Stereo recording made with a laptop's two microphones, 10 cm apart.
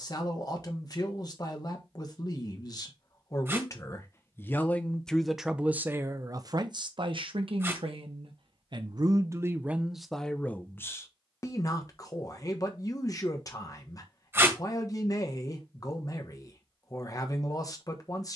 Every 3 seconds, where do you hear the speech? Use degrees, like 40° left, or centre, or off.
40° left, 10° left, 50° right, centre, 40° left, 40° left.